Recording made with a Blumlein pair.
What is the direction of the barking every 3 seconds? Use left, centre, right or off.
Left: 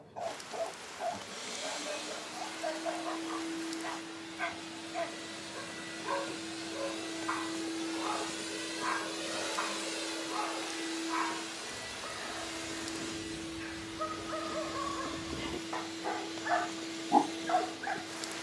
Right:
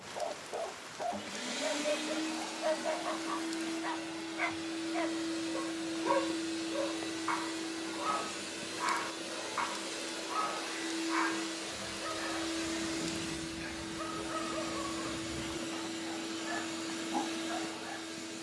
right, right, right, right, centre, left.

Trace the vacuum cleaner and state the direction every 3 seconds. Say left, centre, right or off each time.
right, right, centre, centre, right, right.